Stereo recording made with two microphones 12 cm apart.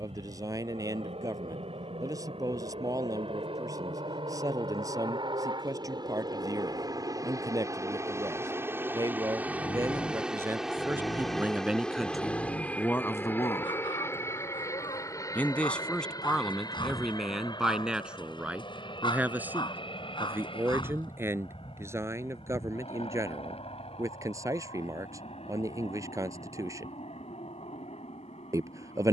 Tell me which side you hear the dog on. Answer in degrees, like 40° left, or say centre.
40° left.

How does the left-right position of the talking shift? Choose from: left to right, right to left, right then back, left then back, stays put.
left then back.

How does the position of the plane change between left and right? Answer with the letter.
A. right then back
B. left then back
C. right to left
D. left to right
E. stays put
C.